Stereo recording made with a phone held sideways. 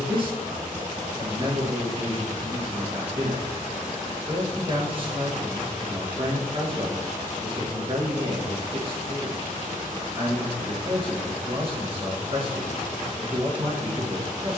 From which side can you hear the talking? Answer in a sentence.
You can hear the talking on the right.